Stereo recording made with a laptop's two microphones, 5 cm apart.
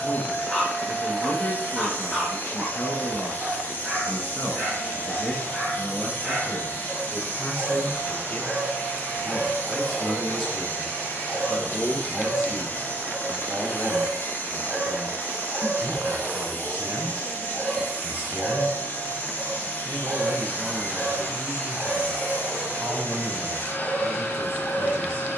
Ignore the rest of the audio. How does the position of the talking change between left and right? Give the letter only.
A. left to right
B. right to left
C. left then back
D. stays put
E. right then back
A.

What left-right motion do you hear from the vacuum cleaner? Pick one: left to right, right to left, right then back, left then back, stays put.
stays put.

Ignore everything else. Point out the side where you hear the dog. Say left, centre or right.
centre.